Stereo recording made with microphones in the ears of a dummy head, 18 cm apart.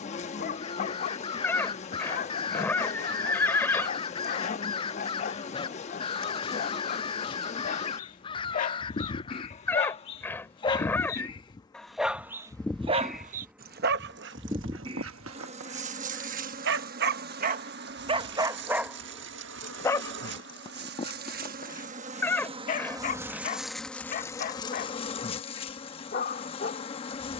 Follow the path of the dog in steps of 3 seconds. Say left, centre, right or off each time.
left, left, left, left, right, right, centre, left, left.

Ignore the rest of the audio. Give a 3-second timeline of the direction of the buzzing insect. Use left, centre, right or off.
left, left, left, left, centre, right, right, right, left.